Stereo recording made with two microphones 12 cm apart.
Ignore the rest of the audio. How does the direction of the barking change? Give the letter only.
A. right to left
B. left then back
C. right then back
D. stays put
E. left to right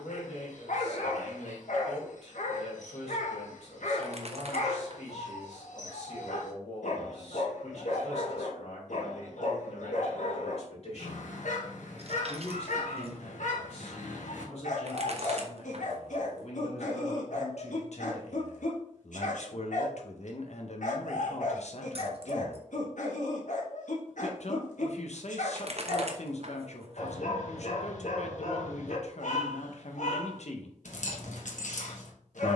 D.